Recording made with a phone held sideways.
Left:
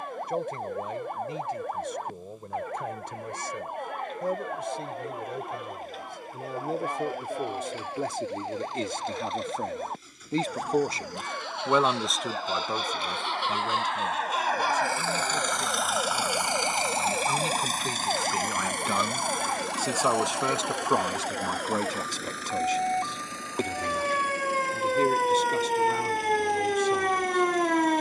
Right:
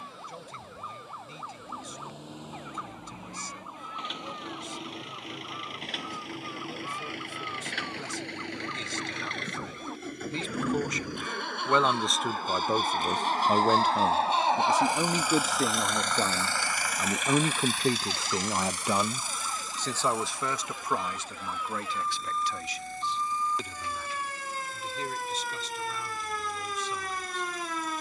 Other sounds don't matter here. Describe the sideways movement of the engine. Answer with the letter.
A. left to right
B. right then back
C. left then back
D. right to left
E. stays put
D.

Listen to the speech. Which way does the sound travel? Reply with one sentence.
You can hear the speech move from left to right and back again.